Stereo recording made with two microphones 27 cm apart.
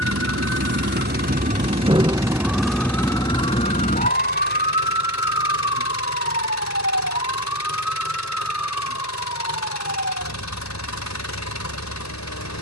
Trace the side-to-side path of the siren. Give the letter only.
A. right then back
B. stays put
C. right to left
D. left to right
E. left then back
C.